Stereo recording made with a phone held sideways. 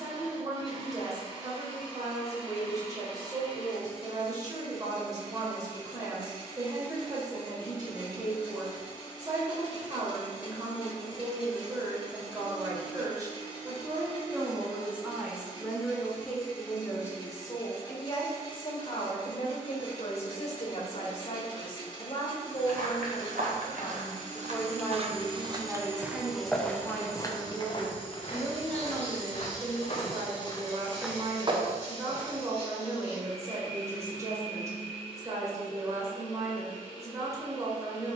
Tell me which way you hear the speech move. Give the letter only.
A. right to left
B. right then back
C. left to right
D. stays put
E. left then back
E.